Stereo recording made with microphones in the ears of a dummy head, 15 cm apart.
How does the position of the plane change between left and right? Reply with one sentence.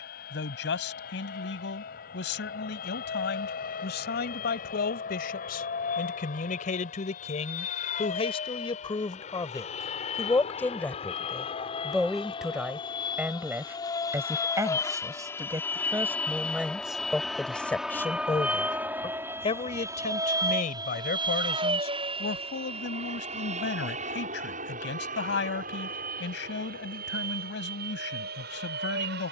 In this clip you hear the plane go from the left side to the right.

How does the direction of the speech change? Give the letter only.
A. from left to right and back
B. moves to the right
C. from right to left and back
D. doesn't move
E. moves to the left
A.